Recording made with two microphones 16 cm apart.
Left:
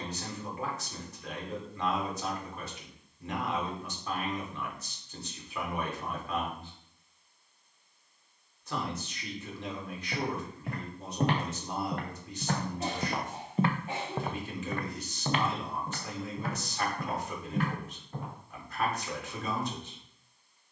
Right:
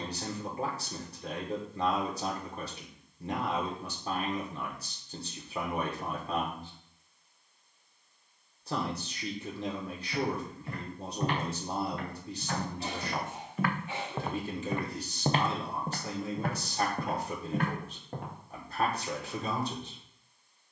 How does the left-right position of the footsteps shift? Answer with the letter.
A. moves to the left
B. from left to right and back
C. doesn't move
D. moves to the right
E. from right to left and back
D.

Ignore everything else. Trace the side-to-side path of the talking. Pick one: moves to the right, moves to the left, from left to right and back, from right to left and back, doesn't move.
doesn't move.